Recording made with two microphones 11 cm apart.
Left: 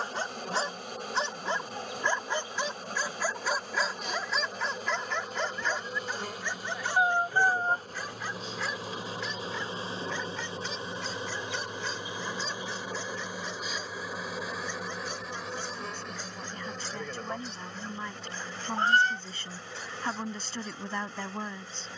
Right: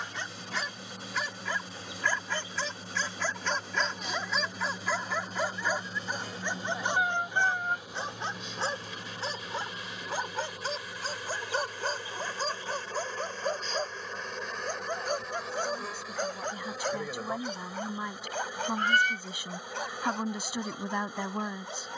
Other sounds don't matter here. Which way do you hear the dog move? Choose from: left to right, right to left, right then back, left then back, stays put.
left to right.